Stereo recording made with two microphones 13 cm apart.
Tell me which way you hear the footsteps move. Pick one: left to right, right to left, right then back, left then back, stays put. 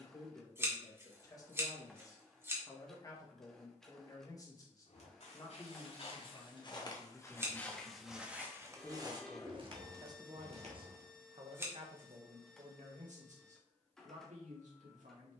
left to right.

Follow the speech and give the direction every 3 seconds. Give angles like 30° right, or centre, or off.
30° left, 30° left, 10° left, 40° right, 70° right.